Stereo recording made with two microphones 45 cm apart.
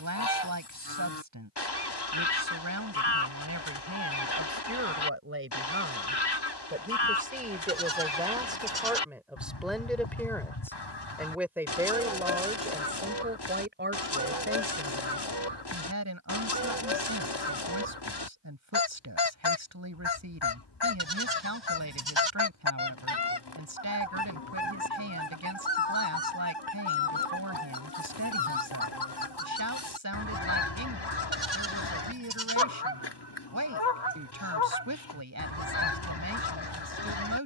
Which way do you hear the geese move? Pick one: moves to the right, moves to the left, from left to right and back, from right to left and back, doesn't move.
doesn't move.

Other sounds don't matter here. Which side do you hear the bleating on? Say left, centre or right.
right.